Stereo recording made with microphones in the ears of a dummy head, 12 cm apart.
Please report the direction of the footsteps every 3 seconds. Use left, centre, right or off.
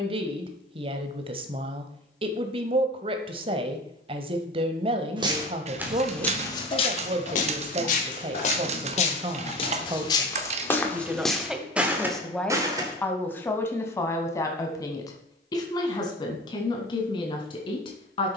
off, right, left, left, right, off.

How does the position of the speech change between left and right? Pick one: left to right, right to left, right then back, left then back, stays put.
right to left.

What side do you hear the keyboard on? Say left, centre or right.
right.